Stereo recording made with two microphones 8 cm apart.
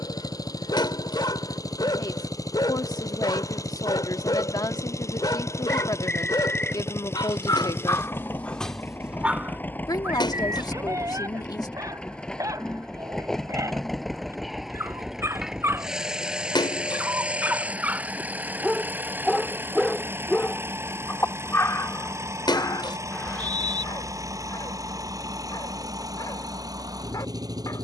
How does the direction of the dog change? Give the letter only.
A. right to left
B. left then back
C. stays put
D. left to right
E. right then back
E.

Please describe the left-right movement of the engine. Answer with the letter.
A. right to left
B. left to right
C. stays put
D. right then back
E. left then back
B.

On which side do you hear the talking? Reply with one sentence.
You can hear the talking on the left.